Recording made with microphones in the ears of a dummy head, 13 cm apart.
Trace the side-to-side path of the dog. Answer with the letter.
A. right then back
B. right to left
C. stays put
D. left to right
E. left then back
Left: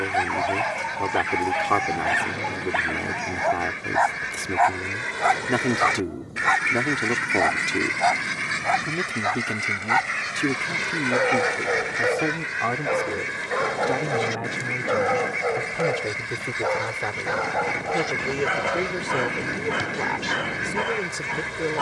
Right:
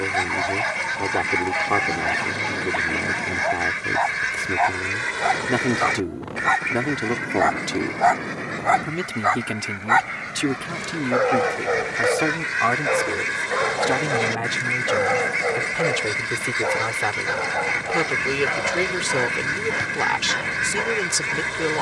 A.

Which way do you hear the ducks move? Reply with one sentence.
In this clip you hear the ducks go left and come back.